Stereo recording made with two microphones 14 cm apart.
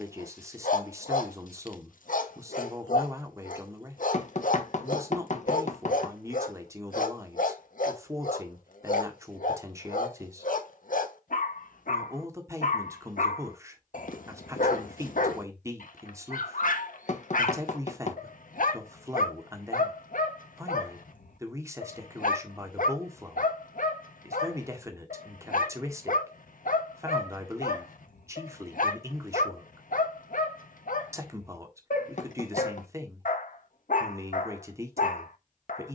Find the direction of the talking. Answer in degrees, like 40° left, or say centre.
20° right.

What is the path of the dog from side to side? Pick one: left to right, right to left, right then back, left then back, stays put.
stays put.